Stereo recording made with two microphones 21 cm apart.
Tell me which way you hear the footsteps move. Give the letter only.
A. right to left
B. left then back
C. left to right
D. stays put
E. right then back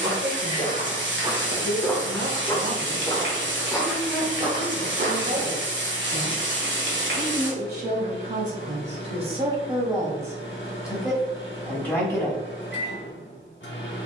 B.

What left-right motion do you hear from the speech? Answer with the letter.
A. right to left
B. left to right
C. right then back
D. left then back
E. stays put
A.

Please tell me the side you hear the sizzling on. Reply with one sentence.
In this clip you hear the sizzling on the right.